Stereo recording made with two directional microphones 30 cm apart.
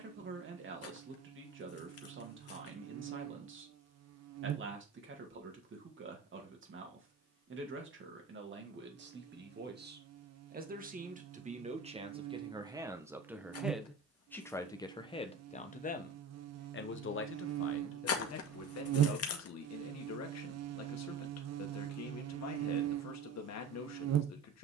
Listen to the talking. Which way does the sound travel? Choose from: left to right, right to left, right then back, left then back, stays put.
right to left.